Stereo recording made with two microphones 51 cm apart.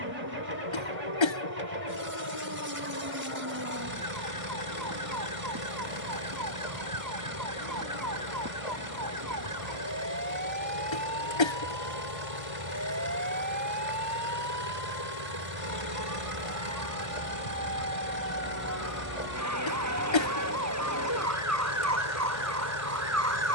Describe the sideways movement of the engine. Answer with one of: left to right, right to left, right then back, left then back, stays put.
stays put.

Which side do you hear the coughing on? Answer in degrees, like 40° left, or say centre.
60° left.